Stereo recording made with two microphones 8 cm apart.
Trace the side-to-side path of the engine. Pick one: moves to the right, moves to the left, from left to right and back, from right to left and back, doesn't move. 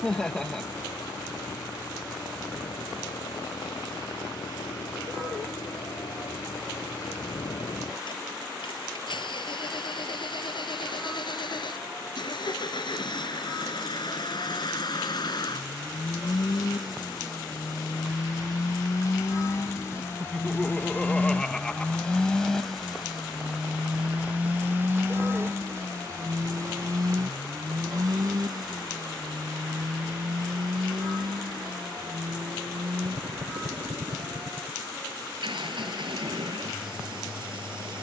moves to the right.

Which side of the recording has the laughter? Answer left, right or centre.
centre.